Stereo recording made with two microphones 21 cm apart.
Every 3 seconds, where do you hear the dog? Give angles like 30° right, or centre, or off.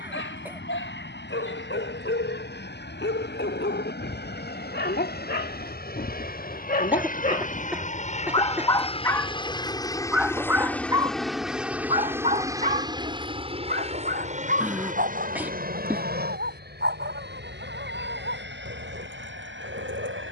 70° left, 60° left, 40° left, 10° right, 40° right, 60° right, 70° right.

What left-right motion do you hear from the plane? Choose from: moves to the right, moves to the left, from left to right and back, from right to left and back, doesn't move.
moves to the right.